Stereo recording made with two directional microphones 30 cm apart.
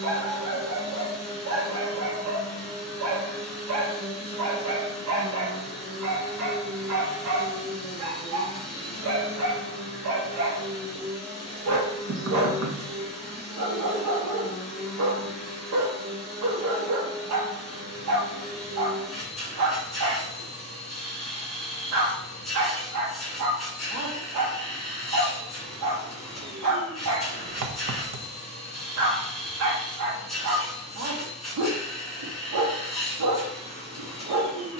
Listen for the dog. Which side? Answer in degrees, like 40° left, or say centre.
60° right.